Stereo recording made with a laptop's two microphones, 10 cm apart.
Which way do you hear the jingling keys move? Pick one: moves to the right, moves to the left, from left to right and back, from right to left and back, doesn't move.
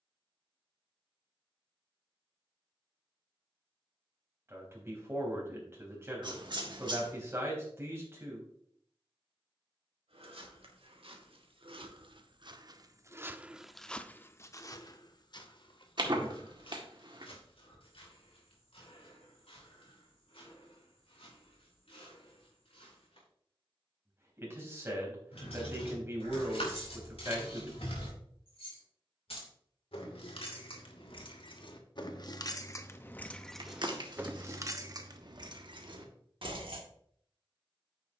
moves to the right.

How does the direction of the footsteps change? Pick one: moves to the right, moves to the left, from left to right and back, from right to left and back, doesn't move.
moves to the left.